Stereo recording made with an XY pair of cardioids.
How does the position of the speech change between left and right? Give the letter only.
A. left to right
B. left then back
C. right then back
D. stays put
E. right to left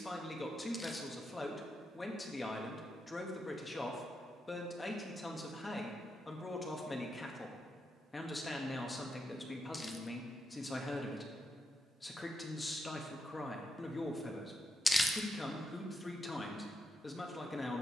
D.